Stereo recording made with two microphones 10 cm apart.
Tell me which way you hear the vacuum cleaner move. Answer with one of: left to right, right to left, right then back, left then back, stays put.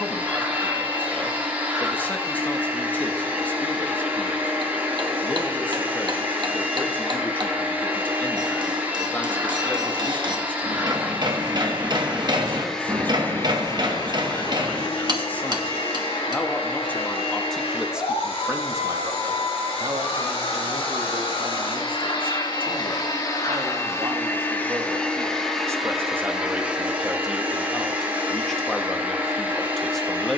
left then back.